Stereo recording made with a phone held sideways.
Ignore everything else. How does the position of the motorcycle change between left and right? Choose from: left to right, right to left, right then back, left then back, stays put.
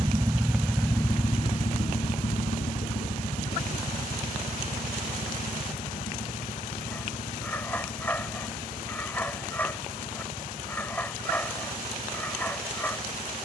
right to left.